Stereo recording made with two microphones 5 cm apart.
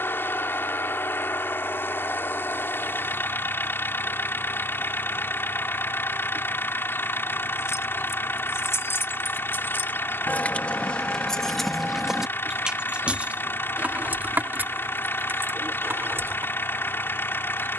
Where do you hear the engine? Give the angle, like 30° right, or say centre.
50° left.